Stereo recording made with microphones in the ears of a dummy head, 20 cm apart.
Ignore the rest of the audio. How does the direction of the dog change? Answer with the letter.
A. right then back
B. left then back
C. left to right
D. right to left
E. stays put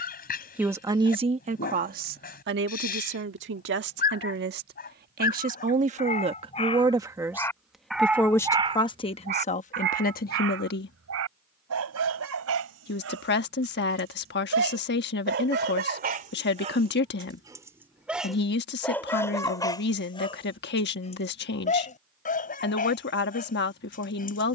A.